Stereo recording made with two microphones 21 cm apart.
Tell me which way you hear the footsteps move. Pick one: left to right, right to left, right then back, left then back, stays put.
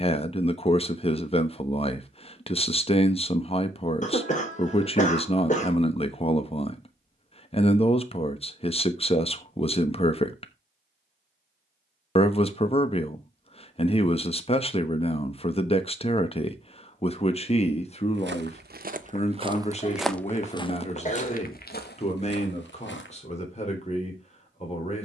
right to left.